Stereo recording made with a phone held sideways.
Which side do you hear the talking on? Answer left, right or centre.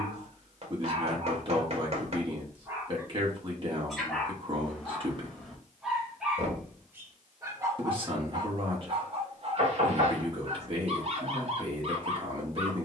right.